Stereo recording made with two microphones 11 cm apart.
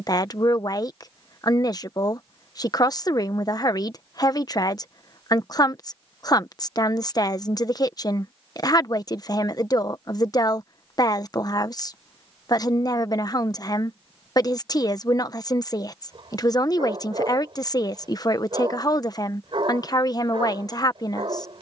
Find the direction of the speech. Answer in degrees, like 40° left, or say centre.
30° left.